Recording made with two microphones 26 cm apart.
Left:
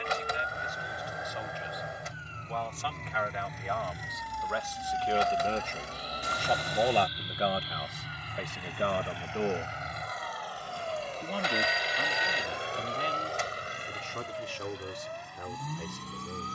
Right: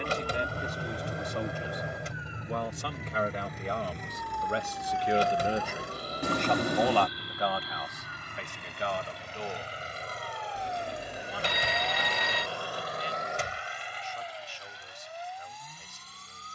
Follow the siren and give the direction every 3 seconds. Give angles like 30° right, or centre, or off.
20° right, 10° left, 30° left, 40° left, 50° left, 60° left.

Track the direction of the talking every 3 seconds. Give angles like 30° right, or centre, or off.
50° right, 30° right, 30° left, 60° left, 80° left, 80° left.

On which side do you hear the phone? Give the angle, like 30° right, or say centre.
70° right.